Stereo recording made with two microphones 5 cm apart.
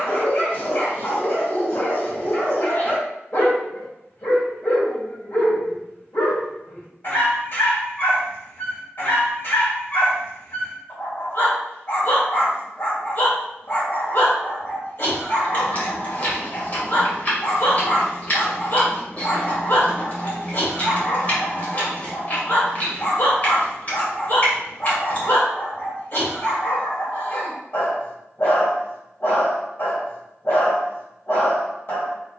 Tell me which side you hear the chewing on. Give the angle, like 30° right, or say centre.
40° left.